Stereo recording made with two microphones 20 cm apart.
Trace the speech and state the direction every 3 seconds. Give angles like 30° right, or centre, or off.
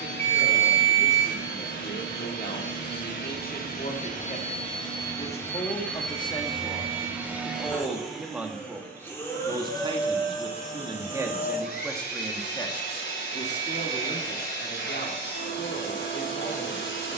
50° left, 40° left, 10° left, 20° right, 30° left, 50° left.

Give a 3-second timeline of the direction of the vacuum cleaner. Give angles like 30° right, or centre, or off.
70° left, 30° left, centre, 30° left, 60° left, 70° left.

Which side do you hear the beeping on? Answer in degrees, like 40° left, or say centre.
10° left.